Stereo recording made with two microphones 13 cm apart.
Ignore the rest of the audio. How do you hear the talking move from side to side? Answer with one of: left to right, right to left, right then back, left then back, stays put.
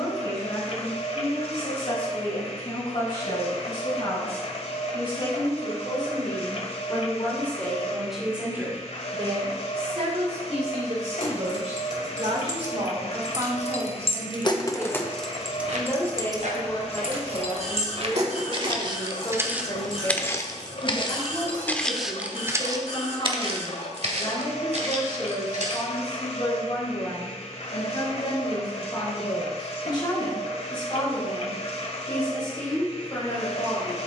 right then back.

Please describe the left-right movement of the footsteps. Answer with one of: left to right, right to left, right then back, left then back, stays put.
left then back.